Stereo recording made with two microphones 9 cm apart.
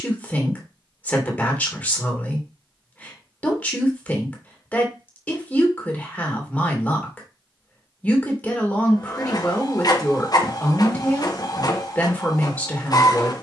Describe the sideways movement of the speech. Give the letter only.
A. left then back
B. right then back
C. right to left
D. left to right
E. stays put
E.